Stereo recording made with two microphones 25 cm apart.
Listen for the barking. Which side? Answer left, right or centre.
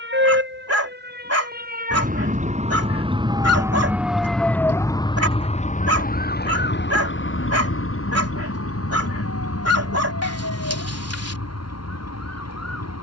right.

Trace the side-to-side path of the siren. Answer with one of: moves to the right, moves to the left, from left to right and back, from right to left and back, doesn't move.
moves to the left.